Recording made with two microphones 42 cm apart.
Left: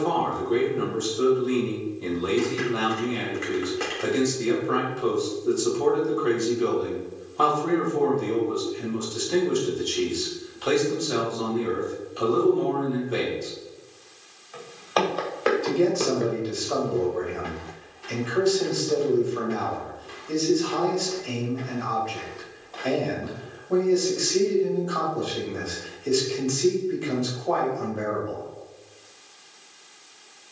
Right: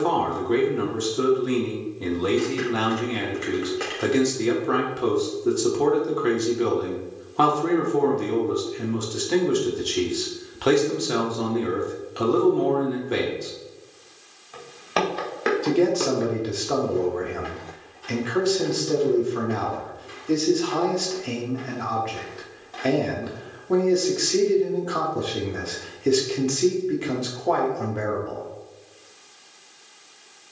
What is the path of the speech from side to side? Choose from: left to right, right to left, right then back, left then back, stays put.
stays put.